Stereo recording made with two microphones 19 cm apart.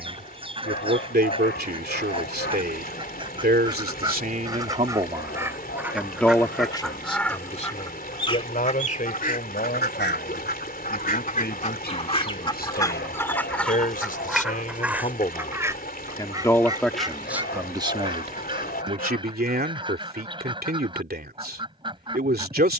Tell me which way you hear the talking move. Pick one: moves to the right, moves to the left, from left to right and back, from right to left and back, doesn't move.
from right to left and back.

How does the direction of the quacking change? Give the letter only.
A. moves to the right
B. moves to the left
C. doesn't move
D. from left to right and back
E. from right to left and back
E.